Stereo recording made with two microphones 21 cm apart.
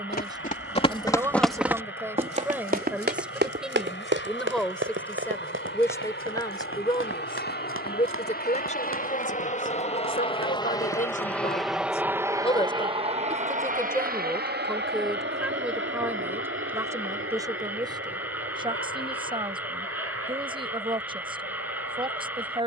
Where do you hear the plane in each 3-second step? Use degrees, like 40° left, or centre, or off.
70° left, 70° left, 60° left, 20° left, 30° right, 60° right, 70° right, 70° right.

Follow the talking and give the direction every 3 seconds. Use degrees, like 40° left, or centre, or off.
10° right, centre, 20° left, 40° left, 10° left, 10° right, 20° right, 20° right.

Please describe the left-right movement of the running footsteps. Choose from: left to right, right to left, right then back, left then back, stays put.
left to right.